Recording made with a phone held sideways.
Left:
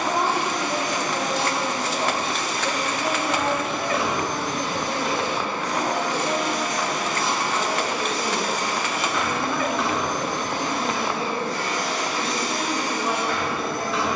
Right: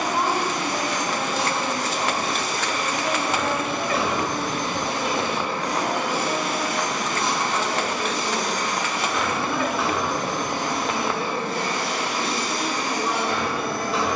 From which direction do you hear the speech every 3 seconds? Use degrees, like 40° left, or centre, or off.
60° left, 30° left, 10° left, 10° right, 10° right.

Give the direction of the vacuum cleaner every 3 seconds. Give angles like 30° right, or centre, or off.
40° right, 30° right, centre, 10° right, 30° right.